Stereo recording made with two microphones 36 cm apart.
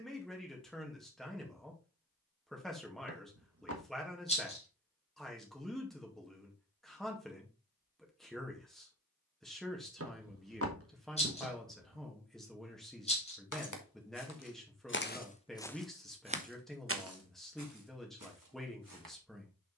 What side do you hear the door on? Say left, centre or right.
right.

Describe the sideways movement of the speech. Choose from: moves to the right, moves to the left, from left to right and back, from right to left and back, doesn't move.
doesn't move.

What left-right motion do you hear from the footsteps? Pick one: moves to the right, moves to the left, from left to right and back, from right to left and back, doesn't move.
moves to the right.